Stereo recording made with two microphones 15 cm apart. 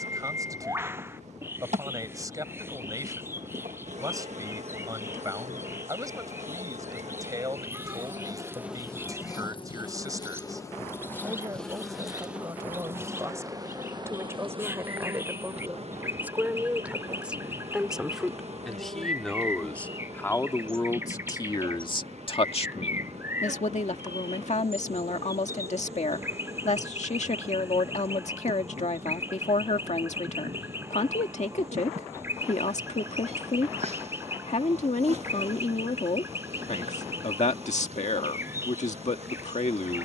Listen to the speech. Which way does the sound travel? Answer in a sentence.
In this clip you hear the speech travel towards the left.